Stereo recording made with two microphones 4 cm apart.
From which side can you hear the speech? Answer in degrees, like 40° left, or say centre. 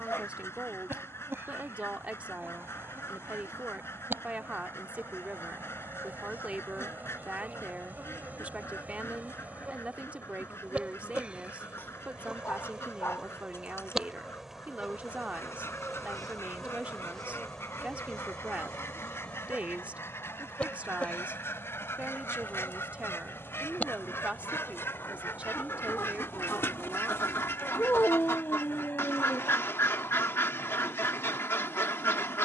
30° right.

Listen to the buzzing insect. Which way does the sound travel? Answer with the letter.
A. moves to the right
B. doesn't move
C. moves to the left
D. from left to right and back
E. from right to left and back
C.